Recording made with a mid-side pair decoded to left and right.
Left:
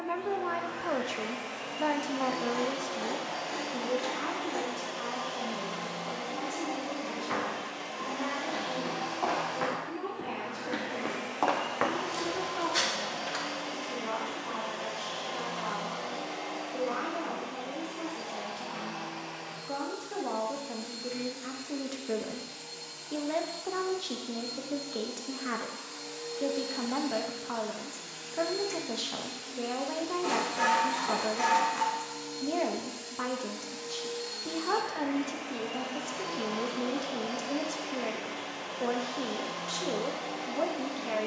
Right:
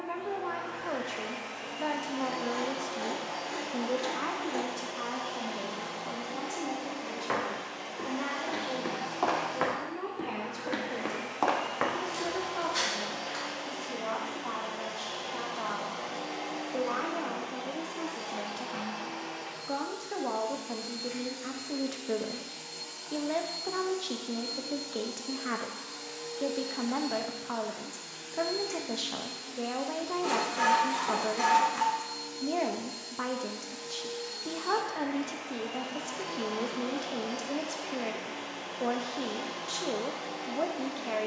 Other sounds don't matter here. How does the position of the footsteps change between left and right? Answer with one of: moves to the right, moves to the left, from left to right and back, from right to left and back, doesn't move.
moves to the left.